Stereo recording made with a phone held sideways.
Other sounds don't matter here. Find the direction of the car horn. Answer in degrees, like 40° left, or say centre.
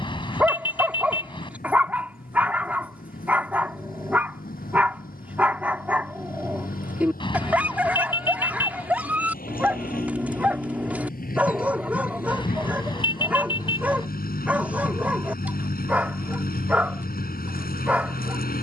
30° left.